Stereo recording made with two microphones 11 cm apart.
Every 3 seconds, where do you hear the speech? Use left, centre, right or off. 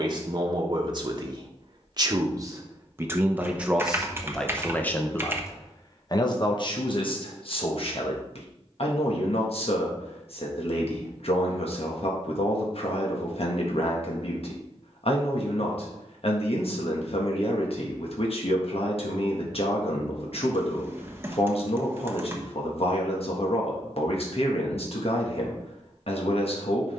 right, centre, left, left, left, left, left, left, left.